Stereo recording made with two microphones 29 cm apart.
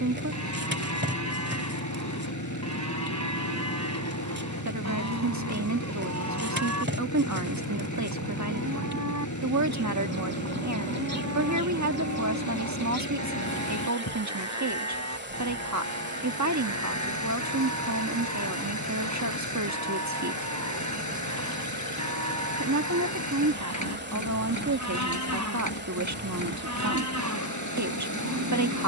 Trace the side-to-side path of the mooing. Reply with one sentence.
In this clip you hear the mooing stay in one place.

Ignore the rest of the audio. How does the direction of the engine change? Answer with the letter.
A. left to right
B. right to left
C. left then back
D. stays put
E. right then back
D.